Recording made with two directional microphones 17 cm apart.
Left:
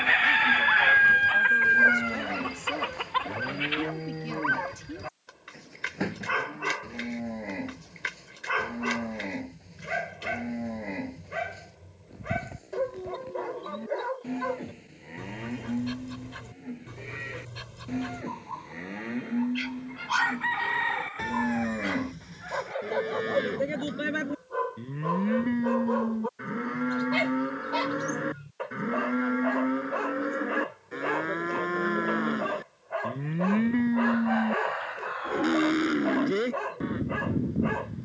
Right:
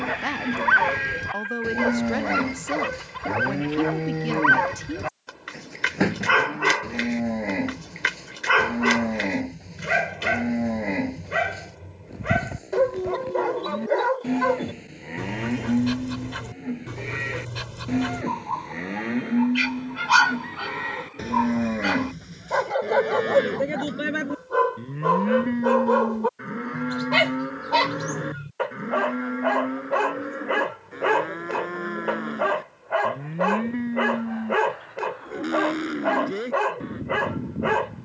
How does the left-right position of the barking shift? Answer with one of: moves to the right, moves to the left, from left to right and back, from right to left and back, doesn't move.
doesn't move.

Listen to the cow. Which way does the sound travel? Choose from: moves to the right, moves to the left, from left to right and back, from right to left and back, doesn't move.
moves to the left.